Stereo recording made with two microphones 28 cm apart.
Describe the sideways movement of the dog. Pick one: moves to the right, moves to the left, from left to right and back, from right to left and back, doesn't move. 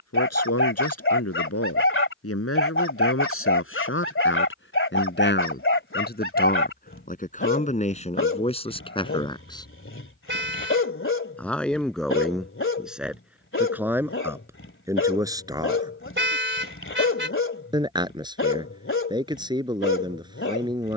doesn't move.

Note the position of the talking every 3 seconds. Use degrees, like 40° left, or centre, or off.
60° left, 50° left, 30° left, 10° left, centre, 10° right, 20° right.